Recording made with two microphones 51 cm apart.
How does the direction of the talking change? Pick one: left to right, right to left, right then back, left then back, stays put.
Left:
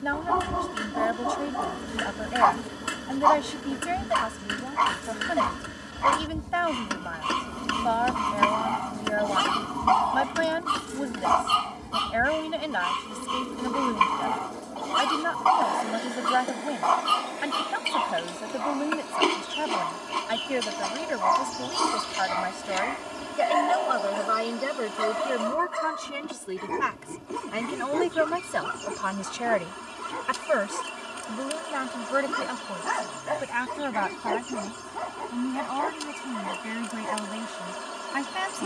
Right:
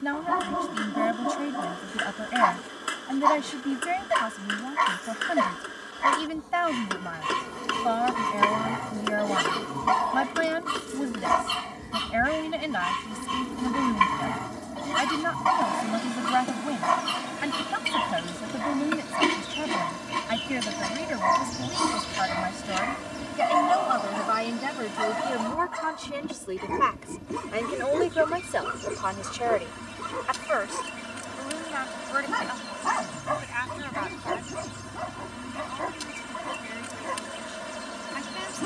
right to left.